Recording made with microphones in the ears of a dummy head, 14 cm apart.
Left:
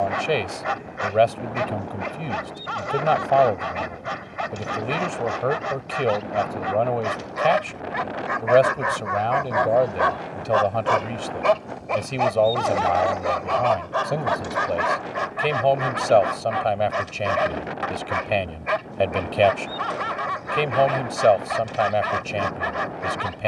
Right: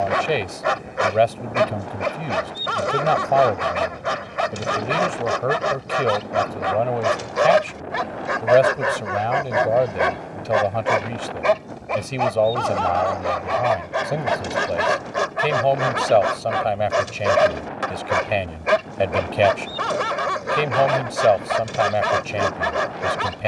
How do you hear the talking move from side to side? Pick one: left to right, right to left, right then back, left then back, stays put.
stays put.